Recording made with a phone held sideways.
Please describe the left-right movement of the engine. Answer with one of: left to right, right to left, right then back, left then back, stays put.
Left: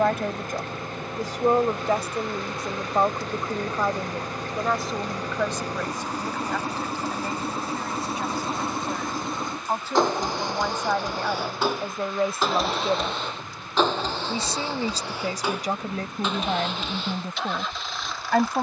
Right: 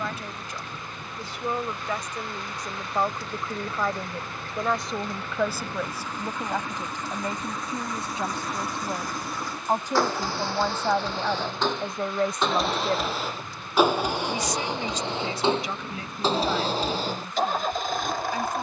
left to right.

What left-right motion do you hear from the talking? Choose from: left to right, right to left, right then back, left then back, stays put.
right then back.